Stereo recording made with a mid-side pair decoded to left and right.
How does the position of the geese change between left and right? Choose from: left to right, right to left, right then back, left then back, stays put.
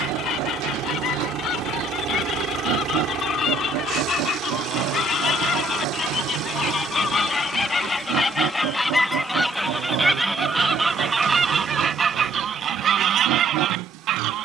left to right.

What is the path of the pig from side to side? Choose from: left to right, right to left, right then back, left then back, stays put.
stays put.